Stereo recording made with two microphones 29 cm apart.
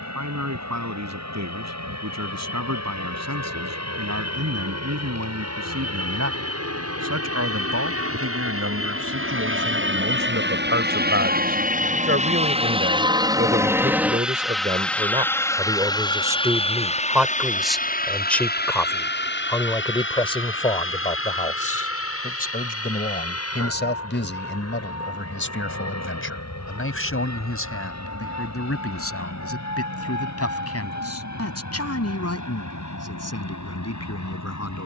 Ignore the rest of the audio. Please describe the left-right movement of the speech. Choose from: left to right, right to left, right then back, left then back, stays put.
right to left.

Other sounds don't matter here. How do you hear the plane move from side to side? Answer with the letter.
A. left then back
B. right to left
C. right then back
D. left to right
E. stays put
B.